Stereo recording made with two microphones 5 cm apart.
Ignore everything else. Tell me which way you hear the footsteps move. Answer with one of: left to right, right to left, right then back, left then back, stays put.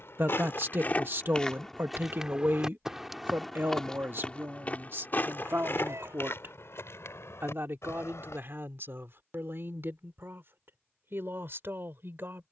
right then back.